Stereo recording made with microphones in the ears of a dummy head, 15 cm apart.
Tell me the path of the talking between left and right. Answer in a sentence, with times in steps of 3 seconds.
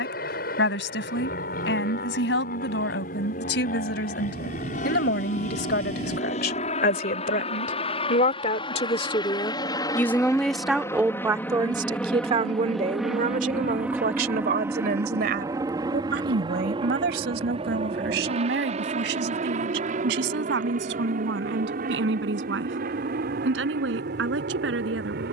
In this clip you hear the talking on the left from 0 s, in the centre from 9 s and on the right from 12 s.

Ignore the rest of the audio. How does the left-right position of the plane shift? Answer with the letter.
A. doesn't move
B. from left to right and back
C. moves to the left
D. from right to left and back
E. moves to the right
E.